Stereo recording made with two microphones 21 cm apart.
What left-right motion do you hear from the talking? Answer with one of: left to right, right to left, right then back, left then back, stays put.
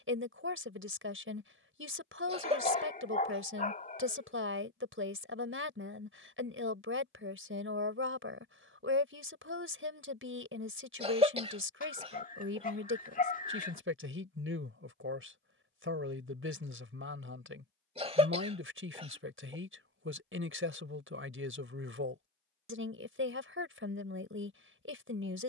stays put.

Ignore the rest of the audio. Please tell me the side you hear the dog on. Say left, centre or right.
left.